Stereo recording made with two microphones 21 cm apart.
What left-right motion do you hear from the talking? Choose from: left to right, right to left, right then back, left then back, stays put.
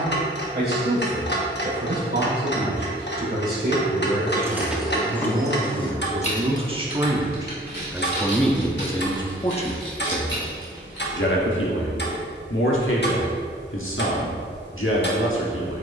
right to left.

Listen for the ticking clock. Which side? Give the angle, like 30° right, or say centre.
50° left.